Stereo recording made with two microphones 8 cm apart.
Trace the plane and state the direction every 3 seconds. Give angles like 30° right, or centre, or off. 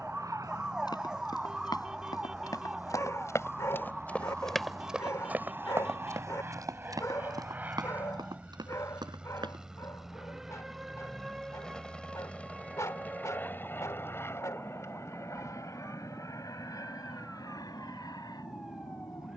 50° right, 40° right, 20° right, centre, 20° left, 40° left, 50° left.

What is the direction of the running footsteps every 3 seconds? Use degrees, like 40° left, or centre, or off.
60° left, centre, 60° right, 70° right, off, off, off.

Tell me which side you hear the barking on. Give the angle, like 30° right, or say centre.
40° left.